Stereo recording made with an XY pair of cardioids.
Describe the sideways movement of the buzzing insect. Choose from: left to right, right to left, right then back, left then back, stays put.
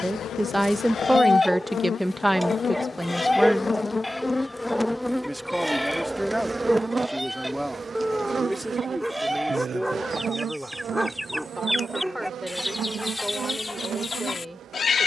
left to right.